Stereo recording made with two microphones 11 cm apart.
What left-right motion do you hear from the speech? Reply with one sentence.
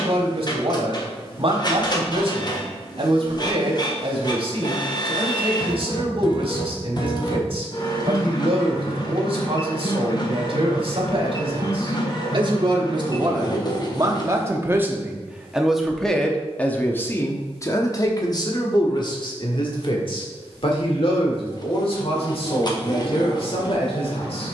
In this clip you hear the speech move to the left.